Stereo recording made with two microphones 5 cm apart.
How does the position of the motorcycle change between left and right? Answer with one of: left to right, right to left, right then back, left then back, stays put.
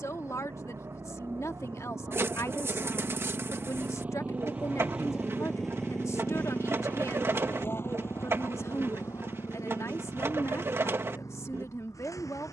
right to left.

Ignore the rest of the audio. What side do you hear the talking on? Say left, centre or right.
left.